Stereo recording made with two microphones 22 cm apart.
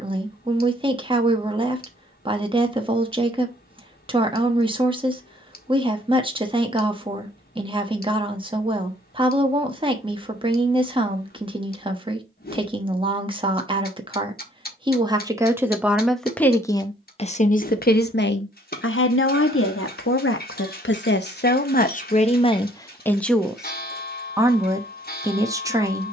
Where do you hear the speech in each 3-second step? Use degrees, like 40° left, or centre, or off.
20° right, 20° right, 20° right, 20° right, 20° right, 10° left, 60° left, 30° left, 20° right.